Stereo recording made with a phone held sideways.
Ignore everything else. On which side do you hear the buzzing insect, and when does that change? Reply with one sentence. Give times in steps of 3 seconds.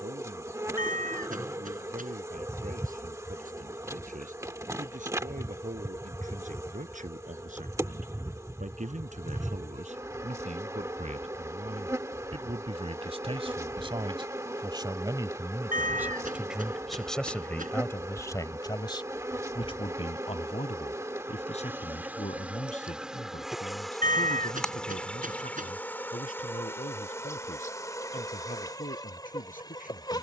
You can hear the buzzing insect on the right from 0 s, in the centre from 21 s and on the left from 27 s.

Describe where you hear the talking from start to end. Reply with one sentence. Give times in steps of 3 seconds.
In this clip you hear the talking on the right from 0 s, in the centre from 15 s and on the left from 18 s.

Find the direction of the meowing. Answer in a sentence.
You can hear the meowing on the right.